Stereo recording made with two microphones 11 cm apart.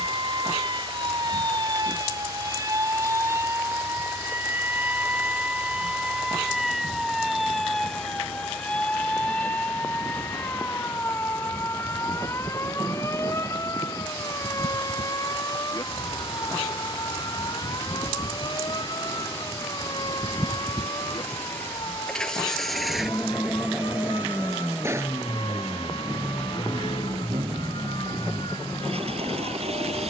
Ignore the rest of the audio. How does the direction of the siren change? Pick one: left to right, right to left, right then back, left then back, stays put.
right to left.